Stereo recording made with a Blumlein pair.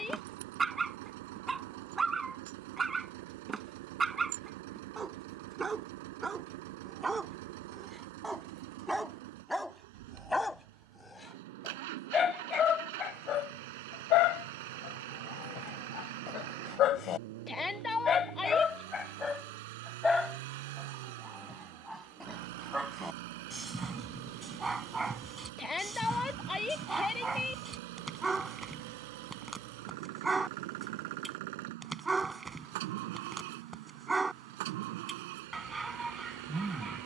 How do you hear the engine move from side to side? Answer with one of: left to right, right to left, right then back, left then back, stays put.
stays put.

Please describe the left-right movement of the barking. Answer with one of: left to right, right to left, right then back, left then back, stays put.
left then back.